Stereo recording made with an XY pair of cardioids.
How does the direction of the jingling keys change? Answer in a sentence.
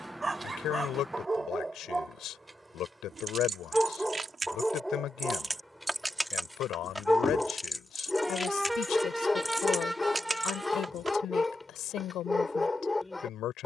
In this clip you hear the jingling keys move from right to left and back again.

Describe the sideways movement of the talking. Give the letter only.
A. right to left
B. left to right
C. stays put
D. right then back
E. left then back
C.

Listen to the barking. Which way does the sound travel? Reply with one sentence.
You can hear the barking go from the right side to the left.